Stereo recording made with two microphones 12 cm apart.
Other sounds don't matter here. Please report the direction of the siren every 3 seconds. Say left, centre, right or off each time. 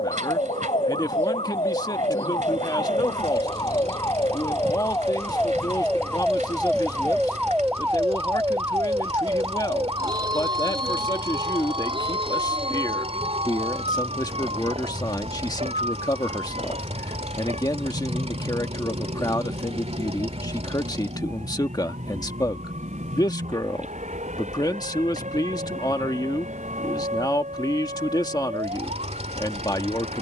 left, left, centre, right, right, right, right, right, right, right.